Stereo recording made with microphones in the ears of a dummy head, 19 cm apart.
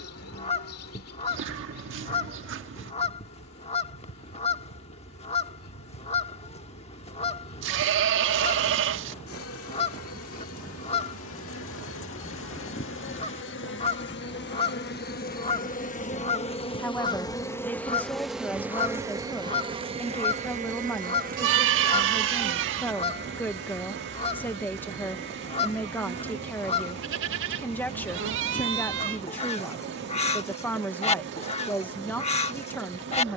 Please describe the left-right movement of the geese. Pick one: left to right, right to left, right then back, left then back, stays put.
stays put.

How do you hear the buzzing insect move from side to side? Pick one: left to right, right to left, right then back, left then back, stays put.
left to right.